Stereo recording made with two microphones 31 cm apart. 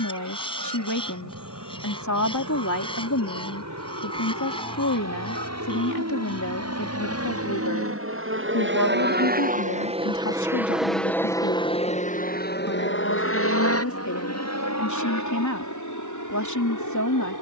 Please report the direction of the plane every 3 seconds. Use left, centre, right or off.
right, right, right, centre, left, left.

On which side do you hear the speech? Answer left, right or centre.
left.